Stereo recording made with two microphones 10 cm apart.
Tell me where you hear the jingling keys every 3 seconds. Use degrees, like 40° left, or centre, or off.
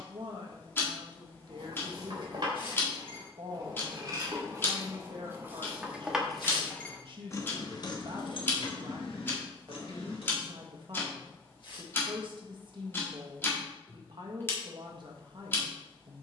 50° right, 30° right, 30° left, 80° left, off, off.